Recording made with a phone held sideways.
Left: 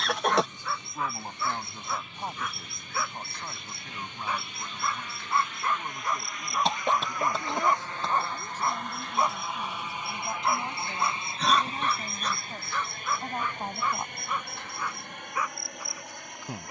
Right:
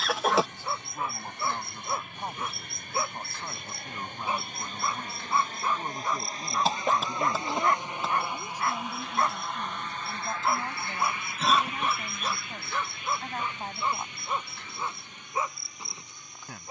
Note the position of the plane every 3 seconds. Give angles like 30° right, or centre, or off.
60° right, 50° right, 20° right, 20° left, 40° left, 60° left.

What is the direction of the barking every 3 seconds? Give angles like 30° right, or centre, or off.
30° right, 20° right, 10° left, centre, 20° right, 20° right.